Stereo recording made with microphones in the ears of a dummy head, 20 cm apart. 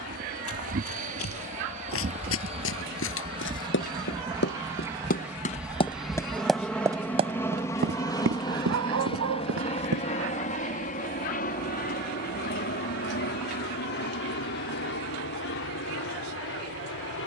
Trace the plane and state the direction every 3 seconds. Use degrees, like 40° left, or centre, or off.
40° right, 20° right, 10° left, 30° left, 50° left, 60° left.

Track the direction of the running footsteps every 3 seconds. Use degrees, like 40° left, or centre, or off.
70° left, 50° left, 30° right, 70° right, off, off.